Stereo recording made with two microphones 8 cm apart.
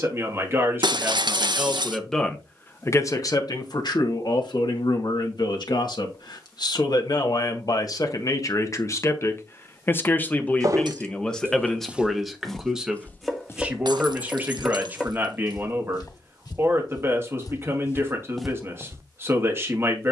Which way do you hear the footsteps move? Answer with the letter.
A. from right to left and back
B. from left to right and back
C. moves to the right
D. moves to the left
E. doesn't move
A.